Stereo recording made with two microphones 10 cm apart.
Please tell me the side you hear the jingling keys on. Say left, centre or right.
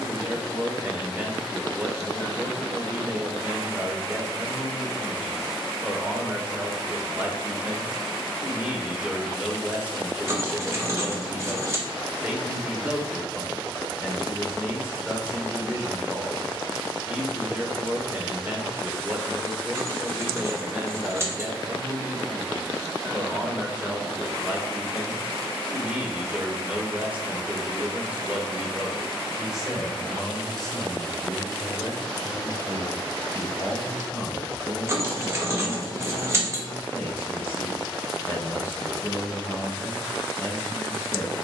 right.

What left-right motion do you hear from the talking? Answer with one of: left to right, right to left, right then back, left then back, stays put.
right to left.